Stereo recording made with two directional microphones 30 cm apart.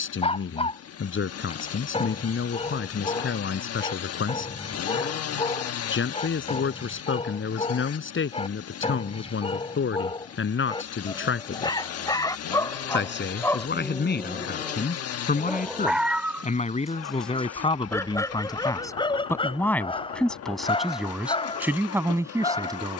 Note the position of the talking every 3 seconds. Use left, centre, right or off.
left, left, left, left, left, left, centre, centre.